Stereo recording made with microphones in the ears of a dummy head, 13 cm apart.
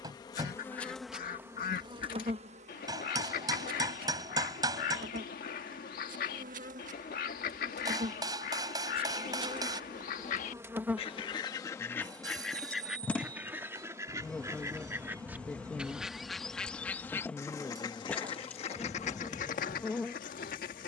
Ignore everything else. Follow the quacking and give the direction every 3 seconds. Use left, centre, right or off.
left, left, left, left, centre, centre, left.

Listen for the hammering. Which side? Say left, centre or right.
right.